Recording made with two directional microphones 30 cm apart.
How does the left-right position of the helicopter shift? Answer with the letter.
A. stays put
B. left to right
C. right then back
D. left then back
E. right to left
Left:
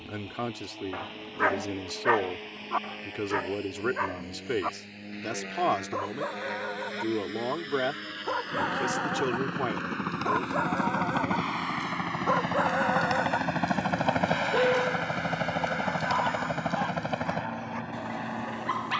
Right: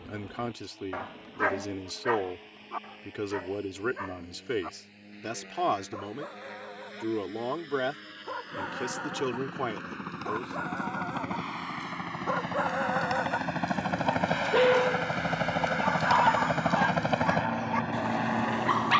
B.